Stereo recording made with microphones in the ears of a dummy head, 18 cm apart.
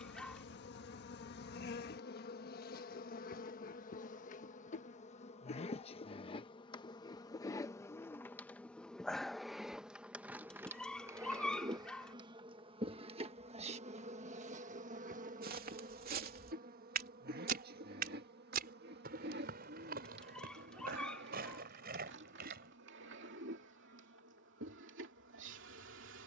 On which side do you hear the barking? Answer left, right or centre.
centre.